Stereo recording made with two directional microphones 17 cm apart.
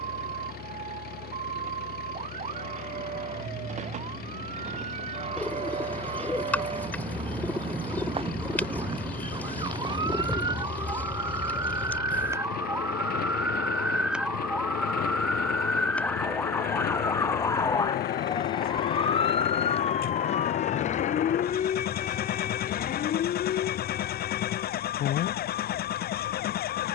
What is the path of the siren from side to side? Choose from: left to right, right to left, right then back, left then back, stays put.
right to left.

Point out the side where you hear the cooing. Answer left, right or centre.
centre.